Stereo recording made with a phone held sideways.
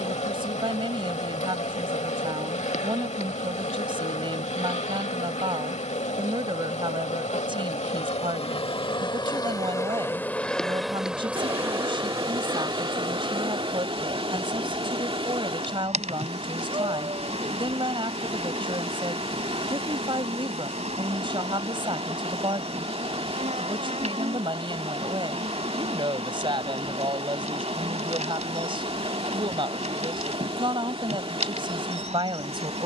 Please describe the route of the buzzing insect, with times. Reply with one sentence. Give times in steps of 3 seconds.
You can hear the buzzing insect on the left from 0 s, in the centre from 9 s and on the right from 12 s.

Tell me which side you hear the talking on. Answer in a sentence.
In this clip you hear the talking on the right.